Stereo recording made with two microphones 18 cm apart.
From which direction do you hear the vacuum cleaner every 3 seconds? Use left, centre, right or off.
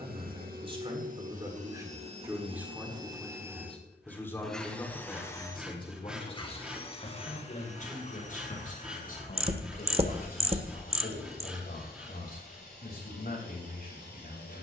right, centre, left, left, left.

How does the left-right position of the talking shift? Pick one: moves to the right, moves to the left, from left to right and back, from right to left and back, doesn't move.
moves to the left.